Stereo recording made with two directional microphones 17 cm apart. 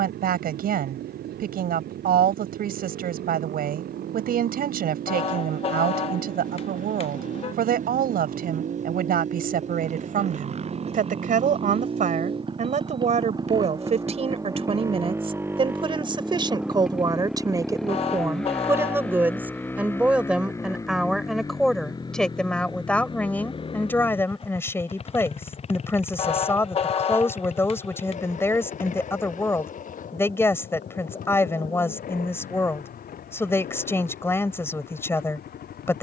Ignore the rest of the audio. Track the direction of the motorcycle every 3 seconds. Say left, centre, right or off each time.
right, right, right, right, right, centre, centre, left, left, left, left, left.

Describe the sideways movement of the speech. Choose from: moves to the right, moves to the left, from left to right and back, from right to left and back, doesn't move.
moves to the left.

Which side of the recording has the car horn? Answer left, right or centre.
left.